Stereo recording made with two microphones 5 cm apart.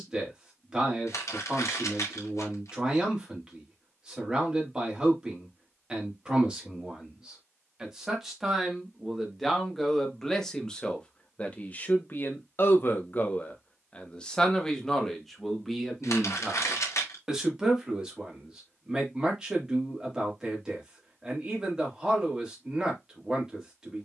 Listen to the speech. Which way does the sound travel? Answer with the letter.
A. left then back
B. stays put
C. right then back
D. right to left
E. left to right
A.